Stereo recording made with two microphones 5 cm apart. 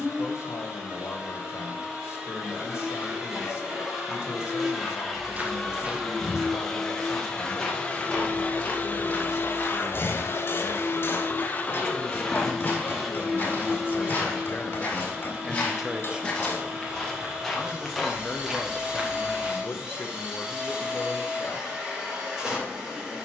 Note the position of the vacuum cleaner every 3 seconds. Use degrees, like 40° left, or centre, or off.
10° right, 10° right, 20° left, 50° left, centre, 10° right, 10° right, 10° right.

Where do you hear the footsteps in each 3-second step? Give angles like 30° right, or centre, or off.
off, 30° right, 10° left, 40° left, 30° left, 10° left, 10° right, off.